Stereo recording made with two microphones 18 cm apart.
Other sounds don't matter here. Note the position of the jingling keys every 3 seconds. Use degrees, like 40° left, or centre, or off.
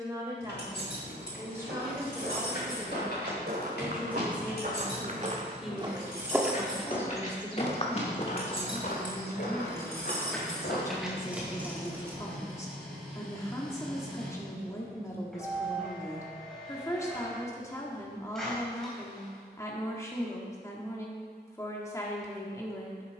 70° left, 60° left, 40° left, centre, 20° right, off, off, off.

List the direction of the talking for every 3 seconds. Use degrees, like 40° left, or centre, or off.
10° right, 10° right, 10° left, 20° left, 20° left, 20° left, 20° left, 20° left.